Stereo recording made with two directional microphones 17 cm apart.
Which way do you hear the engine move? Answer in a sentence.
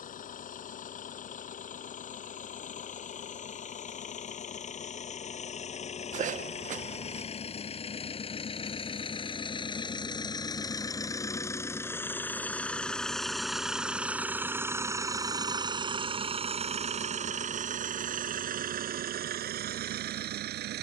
In this clip you hear the engine move to the right.